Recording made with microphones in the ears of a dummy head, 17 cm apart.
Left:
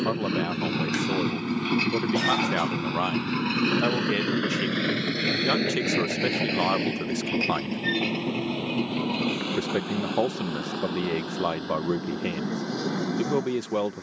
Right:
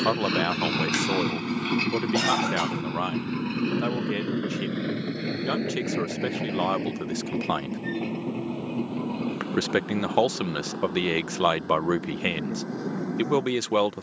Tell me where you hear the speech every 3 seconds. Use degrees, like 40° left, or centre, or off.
30° right, 10° left, centre, 50° right, 60° right.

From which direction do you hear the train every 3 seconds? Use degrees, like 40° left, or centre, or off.
10° right, 50° left, 70° left, 80° left, 80° left.